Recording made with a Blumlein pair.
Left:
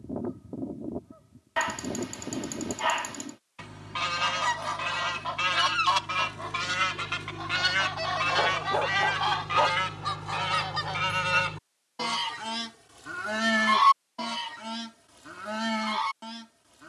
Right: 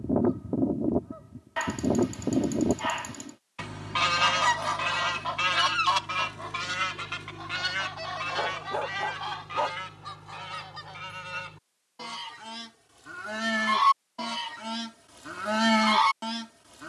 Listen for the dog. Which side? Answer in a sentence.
You can hear the dog in the centre.